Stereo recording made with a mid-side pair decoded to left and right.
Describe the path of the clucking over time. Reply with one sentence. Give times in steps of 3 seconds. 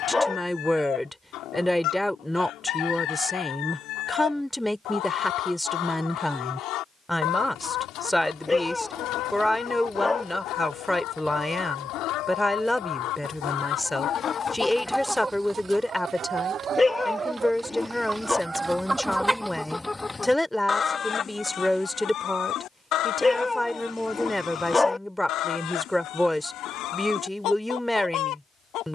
You can hear the clucking on the left from 0 s, on the right from 15 s, in the centre from 18 s and on the left from 21 s.